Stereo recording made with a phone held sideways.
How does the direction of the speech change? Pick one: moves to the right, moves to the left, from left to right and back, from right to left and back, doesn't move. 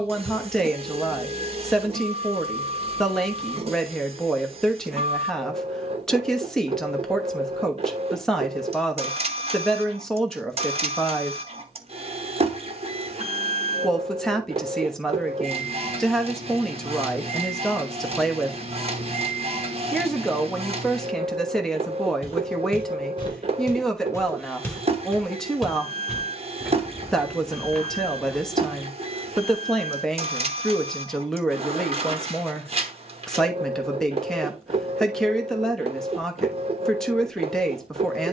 doesn't move.